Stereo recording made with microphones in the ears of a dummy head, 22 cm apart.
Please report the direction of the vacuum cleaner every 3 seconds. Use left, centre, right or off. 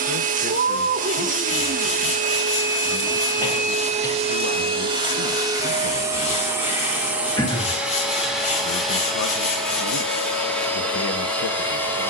right, right, centre, centre.